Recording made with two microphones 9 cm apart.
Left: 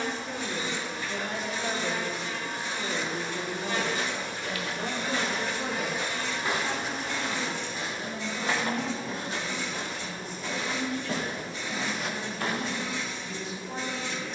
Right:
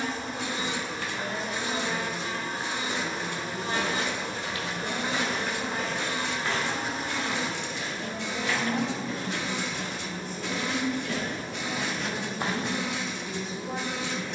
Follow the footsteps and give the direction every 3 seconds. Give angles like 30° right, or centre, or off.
off, 20° right, 30° left, 40° left, 20° right.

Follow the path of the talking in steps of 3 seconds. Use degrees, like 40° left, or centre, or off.
70° left, 50° left, 10° right, 50° right, 60° right.